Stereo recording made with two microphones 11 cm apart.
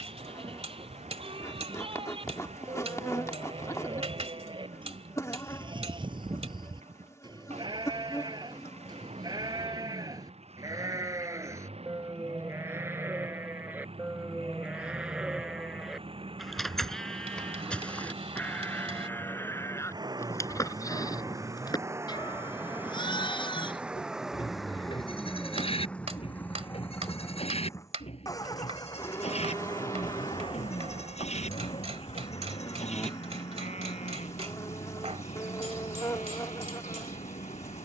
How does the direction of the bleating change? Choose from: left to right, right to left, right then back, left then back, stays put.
right to left.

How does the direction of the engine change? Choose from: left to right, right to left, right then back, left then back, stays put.
right to left.